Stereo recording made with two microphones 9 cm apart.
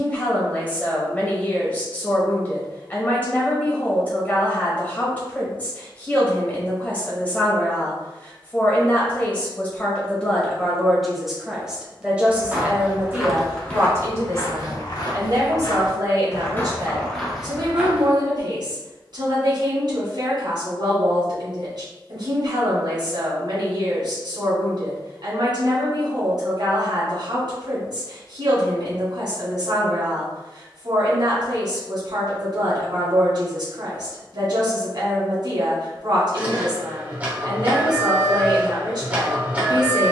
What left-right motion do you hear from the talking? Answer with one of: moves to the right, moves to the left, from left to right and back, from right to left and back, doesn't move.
moves to the right.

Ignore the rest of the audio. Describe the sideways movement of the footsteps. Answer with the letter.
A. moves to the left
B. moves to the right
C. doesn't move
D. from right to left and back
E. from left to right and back
D.